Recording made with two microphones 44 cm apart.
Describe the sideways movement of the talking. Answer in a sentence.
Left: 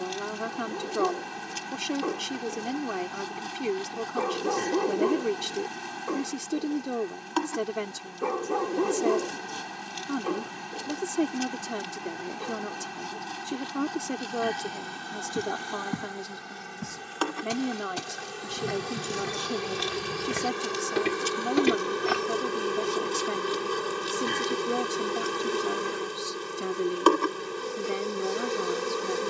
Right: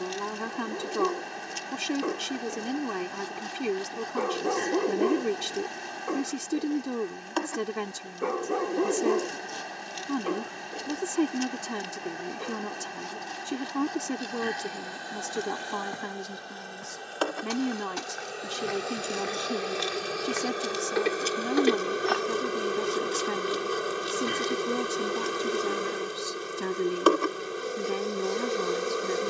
You can hear the talking stay in one place.